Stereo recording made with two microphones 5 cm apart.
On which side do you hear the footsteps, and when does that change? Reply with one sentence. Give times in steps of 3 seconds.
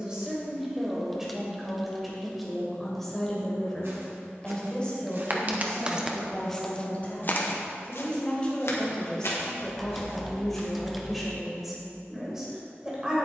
In this clip you hear the footsteps not at all from 0 s, on the right from 3 s, on the left from 6 s and not at all from 12 s.